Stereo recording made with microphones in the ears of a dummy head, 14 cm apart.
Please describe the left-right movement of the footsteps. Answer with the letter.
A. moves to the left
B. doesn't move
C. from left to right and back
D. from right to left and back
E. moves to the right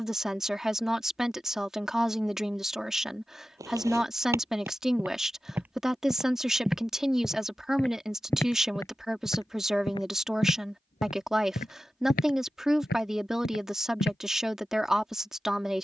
A.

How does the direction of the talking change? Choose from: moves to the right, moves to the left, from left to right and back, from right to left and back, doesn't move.
doesn't move.